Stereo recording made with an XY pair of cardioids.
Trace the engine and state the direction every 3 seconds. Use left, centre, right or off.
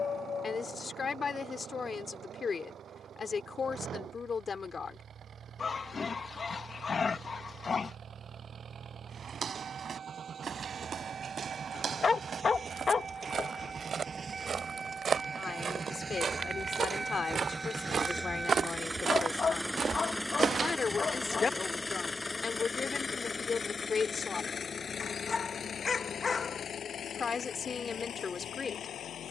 right, right, right, right, right, right, centre, left, left, left.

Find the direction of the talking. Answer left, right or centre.
left.